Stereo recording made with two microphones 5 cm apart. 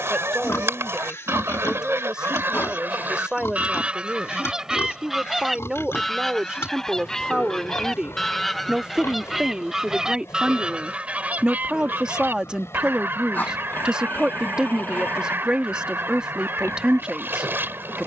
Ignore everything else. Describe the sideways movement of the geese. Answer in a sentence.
You can hear the geese go left and come back.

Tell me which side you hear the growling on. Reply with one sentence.
You can hear the growling on the left.